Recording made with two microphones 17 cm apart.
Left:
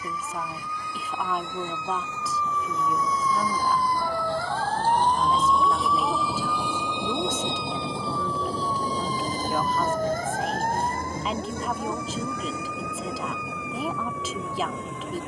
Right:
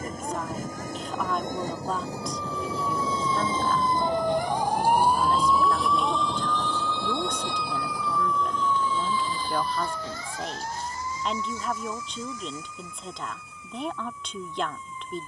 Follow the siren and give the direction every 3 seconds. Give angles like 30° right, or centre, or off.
40° right, 20° right, 20° left, 50° left, 70° left.